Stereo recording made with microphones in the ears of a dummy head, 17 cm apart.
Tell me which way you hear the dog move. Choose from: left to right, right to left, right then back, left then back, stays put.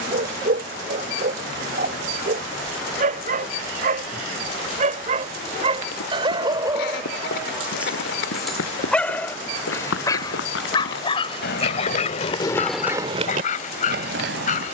right to left.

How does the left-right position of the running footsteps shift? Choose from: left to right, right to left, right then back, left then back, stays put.
left to right.